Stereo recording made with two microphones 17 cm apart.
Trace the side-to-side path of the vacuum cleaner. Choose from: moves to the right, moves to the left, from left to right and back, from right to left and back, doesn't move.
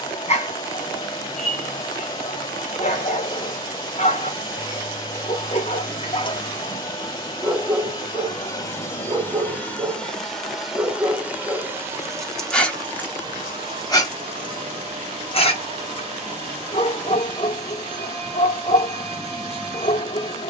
moves to the right.